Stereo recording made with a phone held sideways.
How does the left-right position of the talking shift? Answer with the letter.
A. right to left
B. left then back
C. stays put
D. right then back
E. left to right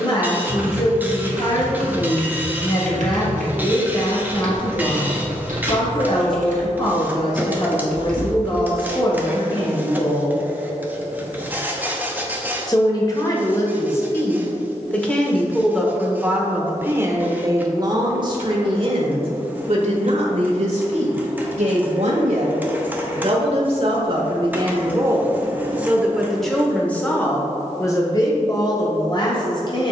D.